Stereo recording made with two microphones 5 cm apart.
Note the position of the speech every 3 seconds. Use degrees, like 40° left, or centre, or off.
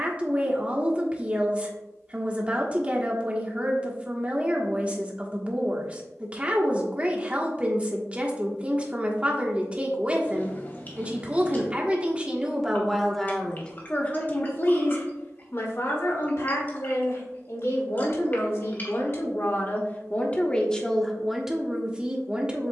20° right, 20° right, 20° right, 20° right, 10° left, 60° left, 40° left, 10° right.